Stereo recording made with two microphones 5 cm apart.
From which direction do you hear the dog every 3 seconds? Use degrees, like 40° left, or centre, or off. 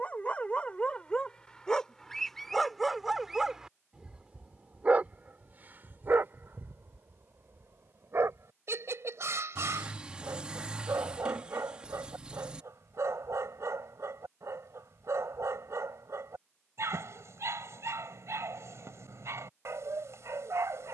20° left, 20° right, 60° right, 70° right, 70° right, 70° right, 70° right.